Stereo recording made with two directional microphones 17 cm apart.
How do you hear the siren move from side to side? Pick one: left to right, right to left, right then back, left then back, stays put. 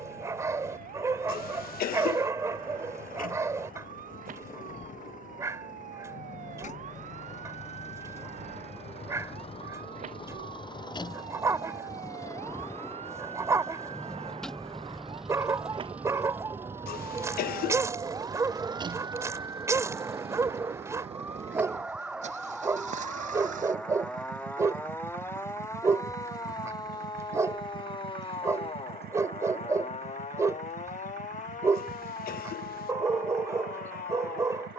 right to left.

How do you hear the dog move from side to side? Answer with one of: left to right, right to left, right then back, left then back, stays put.
stays put.